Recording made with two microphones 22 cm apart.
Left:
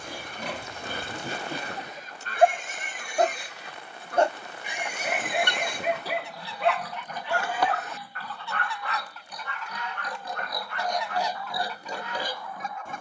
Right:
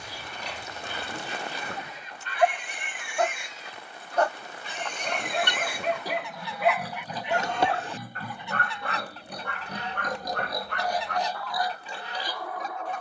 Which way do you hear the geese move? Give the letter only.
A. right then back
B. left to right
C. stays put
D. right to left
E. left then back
E.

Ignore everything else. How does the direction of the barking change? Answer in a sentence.
In this clip you hear the barking travel towards the right.